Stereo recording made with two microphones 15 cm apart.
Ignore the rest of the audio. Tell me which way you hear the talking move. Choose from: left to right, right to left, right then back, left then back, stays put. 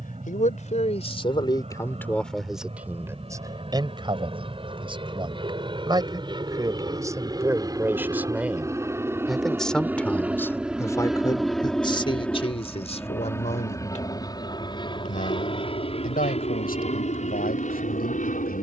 right then back.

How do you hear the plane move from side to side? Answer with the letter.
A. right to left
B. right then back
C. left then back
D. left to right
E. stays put
A.